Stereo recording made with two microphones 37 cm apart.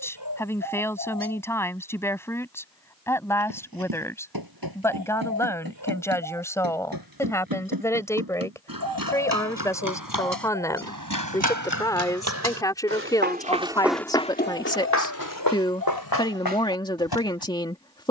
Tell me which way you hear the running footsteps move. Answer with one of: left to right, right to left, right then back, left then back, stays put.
right to left.